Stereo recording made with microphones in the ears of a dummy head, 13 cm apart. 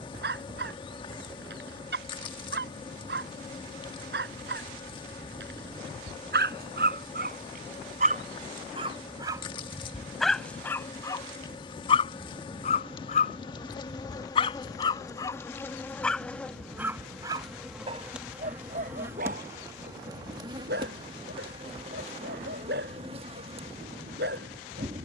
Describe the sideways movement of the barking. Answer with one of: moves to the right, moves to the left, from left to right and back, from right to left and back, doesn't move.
from right to left and back.